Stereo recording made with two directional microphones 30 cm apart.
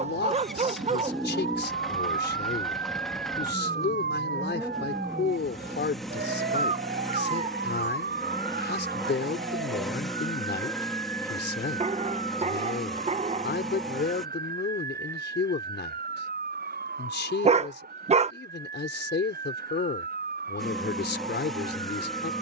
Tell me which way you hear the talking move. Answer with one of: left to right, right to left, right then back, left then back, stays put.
stays put.